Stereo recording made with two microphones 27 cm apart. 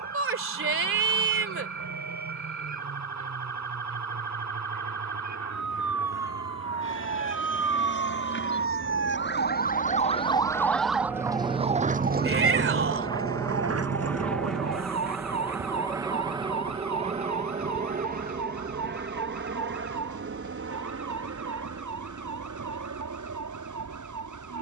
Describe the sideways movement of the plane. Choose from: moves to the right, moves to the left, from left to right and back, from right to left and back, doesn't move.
moves to the right.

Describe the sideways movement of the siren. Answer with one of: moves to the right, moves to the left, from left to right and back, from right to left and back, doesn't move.
moves to the right.